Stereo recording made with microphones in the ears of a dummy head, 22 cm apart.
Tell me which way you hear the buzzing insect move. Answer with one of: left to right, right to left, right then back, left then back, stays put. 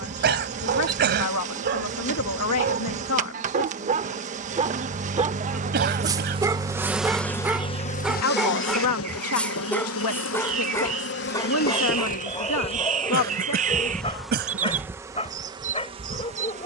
left then back.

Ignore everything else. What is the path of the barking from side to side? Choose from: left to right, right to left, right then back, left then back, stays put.
right to left.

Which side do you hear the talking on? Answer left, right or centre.
left.